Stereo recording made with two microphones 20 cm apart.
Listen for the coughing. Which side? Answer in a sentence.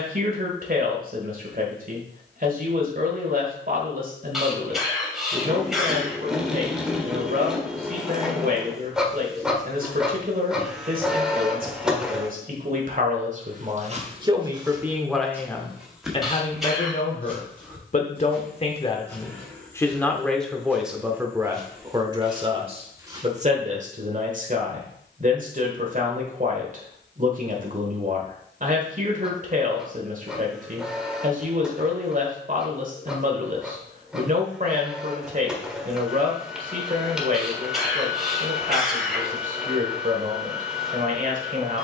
You can hear the coughing in the centre.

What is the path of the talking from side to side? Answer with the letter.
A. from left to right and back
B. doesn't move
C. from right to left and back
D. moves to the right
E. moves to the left
C.